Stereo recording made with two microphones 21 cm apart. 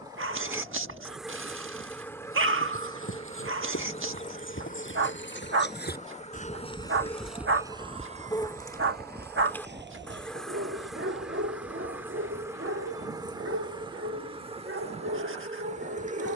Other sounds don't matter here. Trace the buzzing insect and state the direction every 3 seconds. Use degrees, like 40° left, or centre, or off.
centre, 30° left, 20° left, centre, 20° right, 30° right.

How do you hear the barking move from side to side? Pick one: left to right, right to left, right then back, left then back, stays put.
stays put.